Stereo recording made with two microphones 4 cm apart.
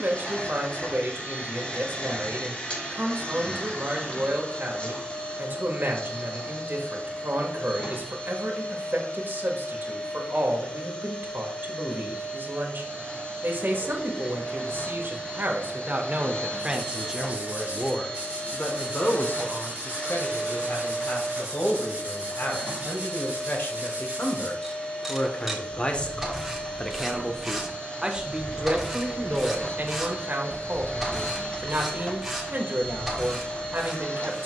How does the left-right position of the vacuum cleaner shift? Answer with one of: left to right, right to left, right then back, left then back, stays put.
stays put.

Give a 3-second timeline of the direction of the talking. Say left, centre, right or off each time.
right, right, right, right, right, right, left, left, left, right, right, right.